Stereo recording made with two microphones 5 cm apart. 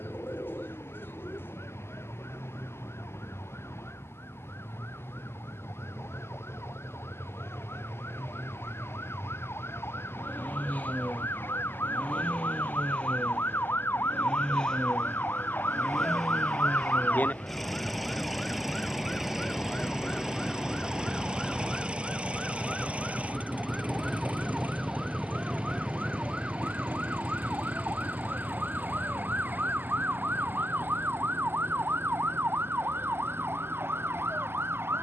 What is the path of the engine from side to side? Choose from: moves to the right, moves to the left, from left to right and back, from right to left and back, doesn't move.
moves to the right.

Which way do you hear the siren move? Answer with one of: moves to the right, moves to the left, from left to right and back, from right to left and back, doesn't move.
moves to the right.